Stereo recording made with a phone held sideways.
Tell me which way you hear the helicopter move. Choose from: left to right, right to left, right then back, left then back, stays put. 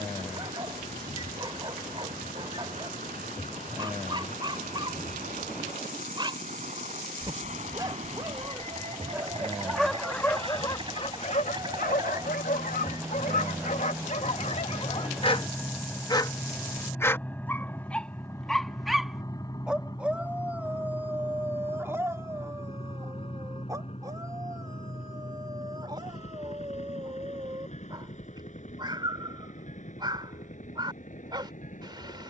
right to left.